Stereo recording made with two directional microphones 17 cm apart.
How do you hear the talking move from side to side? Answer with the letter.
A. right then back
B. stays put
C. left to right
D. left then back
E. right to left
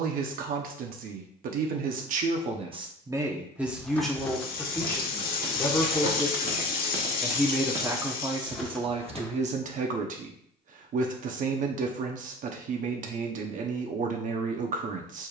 D.